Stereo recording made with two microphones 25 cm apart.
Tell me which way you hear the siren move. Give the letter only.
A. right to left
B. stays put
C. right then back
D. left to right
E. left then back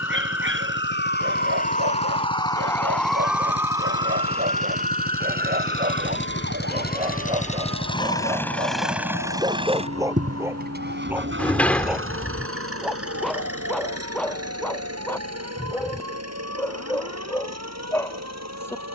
D.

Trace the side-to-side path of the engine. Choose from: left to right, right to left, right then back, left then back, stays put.
left to right.